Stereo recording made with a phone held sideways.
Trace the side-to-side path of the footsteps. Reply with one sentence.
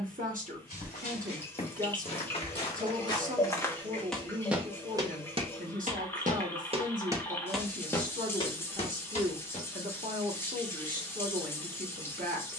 In this clip you hear the footsteps go right and come back.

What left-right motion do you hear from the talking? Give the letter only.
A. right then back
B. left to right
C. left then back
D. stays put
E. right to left
D.